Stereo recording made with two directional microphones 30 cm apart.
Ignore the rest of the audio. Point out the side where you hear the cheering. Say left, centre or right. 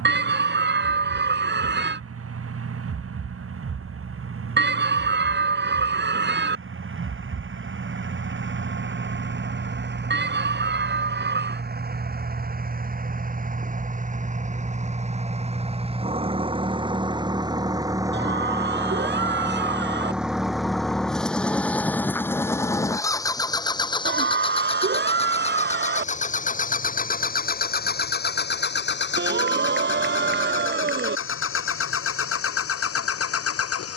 right.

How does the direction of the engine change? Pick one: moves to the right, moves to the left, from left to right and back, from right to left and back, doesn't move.
moves to the left.